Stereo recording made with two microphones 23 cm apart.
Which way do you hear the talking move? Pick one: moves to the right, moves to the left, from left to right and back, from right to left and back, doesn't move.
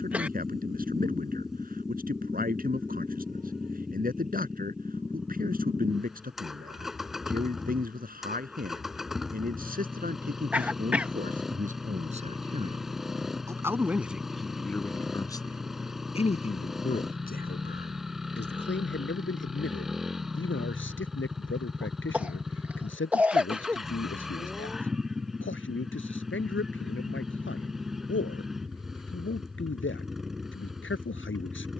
moves to the left.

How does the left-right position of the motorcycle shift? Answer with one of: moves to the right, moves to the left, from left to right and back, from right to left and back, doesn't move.
doesn't move.